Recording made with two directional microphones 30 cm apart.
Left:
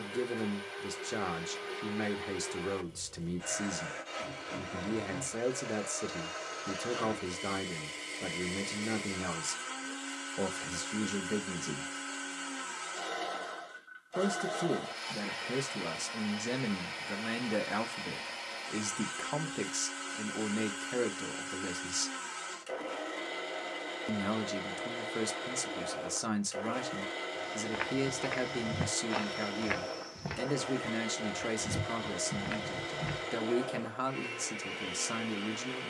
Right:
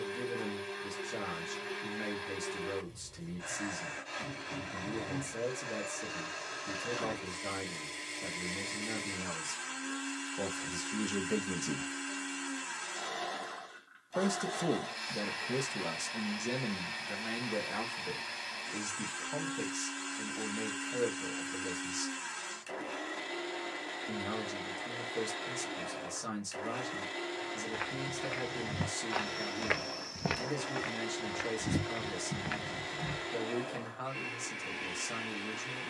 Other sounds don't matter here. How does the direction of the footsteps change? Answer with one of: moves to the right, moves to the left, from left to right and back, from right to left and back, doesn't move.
from left to right and back.